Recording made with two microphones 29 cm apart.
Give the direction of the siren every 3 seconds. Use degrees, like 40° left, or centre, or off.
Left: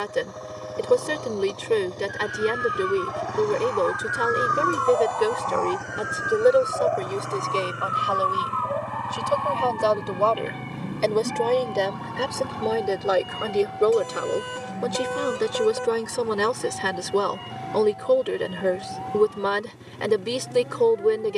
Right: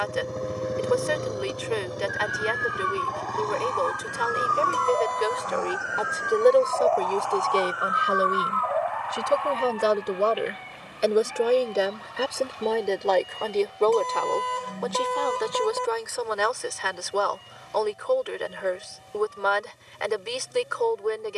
70° right, 30° right, 20° left, 50° left, 60° left, 70° left, 70° left.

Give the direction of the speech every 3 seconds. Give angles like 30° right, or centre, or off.
40° left, 40° left, 10° right, 20° right, 10° left, 40° left, 40° left.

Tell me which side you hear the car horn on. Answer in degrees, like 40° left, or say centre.
10° left.